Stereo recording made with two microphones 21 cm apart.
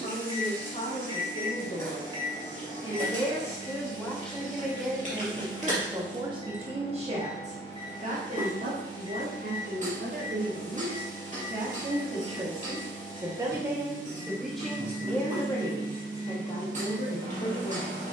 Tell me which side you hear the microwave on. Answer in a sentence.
In this clip you hear the microwave on the left.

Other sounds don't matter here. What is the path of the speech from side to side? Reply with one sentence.
You can hear the speech go right and come back.